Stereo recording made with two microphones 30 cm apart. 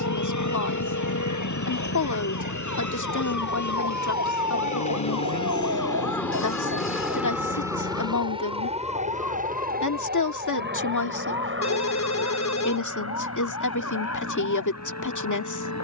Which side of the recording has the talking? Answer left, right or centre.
left.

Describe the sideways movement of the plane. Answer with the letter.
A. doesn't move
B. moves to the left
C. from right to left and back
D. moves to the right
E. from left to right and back
D.